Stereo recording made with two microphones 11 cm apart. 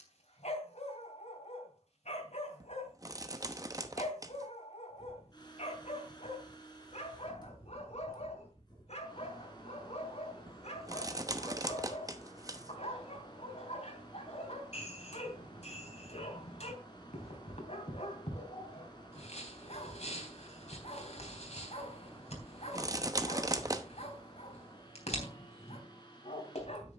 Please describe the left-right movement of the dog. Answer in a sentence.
You can hear the dog stay put.